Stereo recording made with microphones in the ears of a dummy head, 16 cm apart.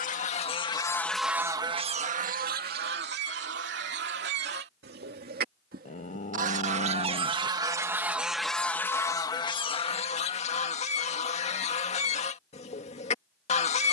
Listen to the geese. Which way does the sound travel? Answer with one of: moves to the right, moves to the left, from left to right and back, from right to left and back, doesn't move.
from left to right and back.